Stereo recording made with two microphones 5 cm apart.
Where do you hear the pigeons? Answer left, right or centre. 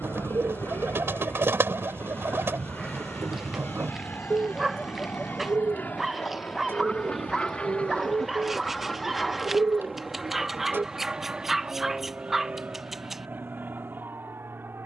right.